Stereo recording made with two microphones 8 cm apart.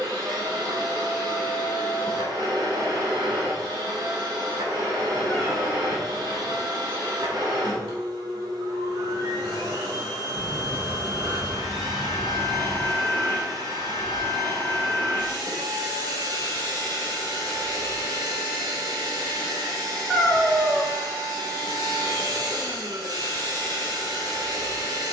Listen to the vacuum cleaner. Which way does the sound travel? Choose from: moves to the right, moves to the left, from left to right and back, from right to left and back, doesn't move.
doesn't move.